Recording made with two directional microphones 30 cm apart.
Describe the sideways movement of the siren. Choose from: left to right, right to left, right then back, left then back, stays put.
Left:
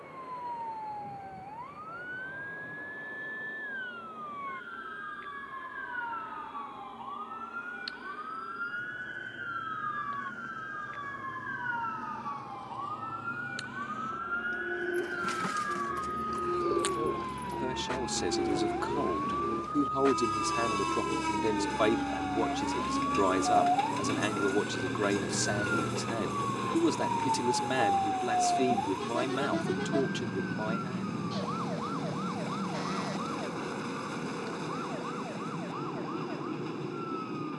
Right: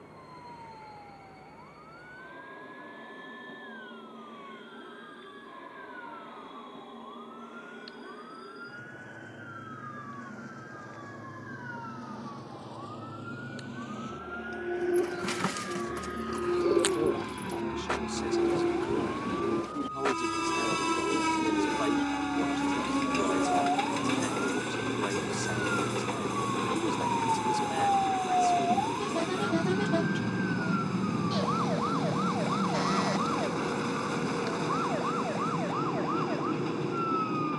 left to right.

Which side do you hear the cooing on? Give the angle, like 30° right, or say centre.
30° right.